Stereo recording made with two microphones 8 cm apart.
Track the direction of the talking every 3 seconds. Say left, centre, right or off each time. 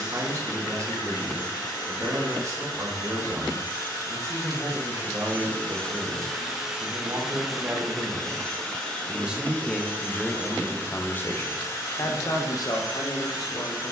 right, right, right, centre, left.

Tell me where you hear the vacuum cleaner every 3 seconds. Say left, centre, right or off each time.
left, left, centre, left, left.